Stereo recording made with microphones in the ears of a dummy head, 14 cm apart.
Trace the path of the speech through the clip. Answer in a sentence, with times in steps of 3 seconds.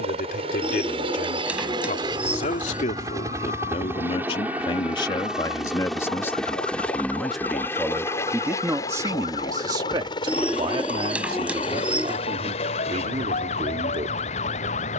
You can hear the speech on the left from 0 s, in the centre from 6 s and on the right from 9 s.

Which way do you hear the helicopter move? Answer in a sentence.
In this clip you hear the helicopter go from the right side to the left.